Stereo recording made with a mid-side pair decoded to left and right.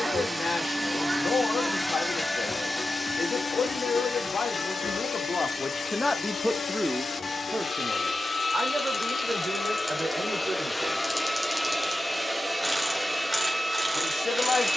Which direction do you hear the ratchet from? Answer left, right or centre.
centre.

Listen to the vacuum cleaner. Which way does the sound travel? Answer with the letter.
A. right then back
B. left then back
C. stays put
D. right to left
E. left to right
B.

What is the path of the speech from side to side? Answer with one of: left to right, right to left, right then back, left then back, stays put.
right then back.